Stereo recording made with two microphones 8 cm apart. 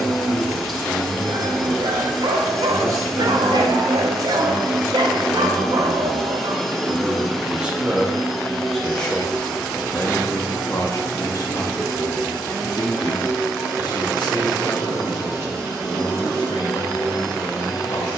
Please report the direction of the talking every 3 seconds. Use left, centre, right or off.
right, right, centre, left, left, left.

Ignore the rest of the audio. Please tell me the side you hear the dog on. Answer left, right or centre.
right.